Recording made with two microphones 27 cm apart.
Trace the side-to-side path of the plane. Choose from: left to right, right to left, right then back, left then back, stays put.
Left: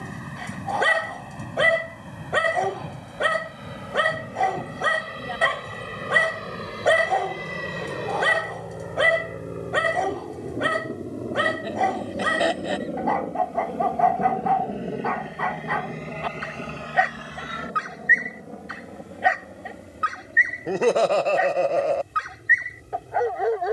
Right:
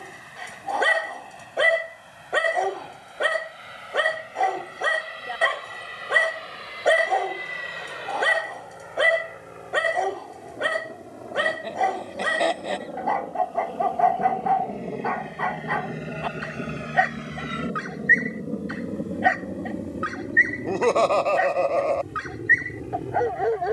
left to right.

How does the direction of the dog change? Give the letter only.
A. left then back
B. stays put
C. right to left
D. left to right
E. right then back
B.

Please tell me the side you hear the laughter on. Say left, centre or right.
centre.